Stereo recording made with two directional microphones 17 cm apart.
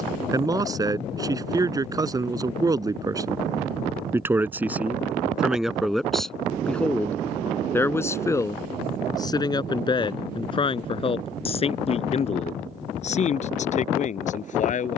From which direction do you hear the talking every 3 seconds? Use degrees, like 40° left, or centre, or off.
20° right, 10° right, 10° left, 30° left, 40° left.